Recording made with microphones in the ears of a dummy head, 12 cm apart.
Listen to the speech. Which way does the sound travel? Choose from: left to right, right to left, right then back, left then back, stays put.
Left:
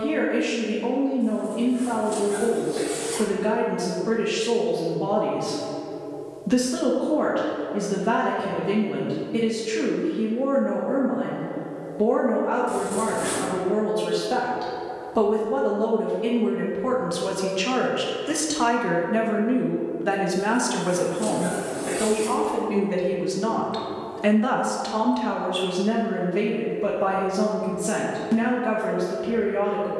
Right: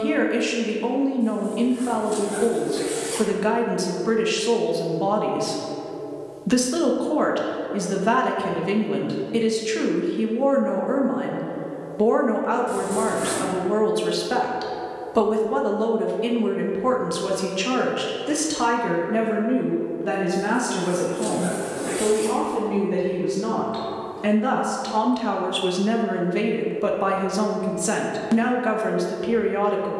left then back.